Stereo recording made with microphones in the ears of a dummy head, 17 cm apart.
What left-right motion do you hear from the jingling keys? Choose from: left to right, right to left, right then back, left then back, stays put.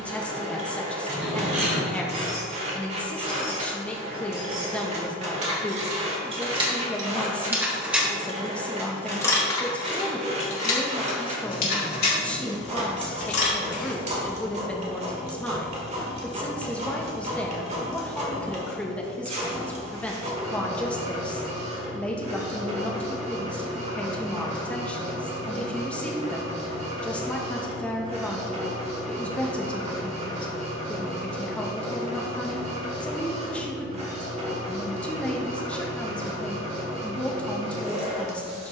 right to left.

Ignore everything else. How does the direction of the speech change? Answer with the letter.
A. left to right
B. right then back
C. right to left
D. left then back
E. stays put
E.